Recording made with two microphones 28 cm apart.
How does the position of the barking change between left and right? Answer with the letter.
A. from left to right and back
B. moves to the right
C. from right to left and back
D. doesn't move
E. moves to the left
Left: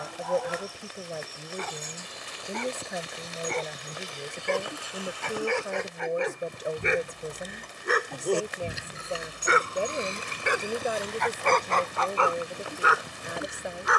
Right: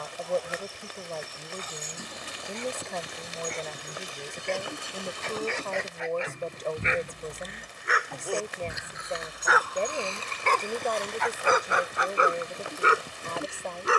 B.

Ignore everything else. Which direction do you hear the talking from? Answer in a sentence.
In this clip you hear the talking in the centre.